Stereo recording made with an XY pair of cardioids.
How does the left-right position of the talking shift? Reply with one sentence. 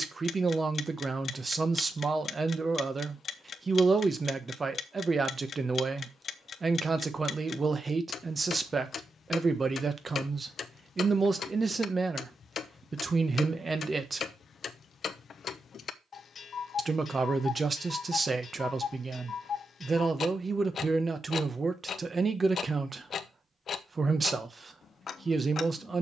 You can hear the talking stay in one place.